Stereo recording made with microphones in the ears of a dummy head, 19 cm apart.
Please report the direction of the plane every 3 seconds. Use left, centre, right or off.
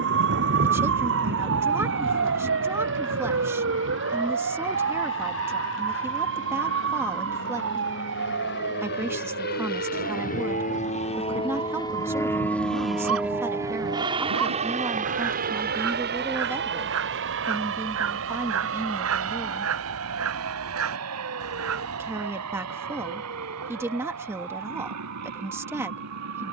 left, left, left, left, centre, right, right, right, right.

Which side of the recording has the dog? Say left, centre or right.
right.